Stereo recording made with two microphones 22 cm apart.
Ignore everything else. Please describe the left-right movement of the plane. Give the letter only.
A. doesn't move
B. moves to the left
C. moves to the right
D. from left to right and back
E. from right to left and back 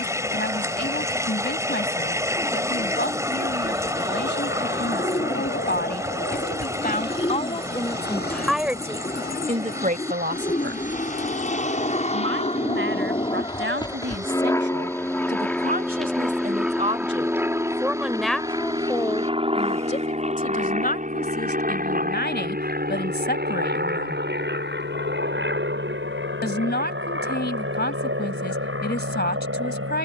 C.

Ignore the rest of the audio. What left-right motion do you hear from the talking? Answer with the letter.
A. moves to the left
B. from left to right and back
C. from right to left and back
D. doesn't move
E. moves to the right
B.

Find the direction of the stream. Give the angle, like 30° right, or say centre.
10° right.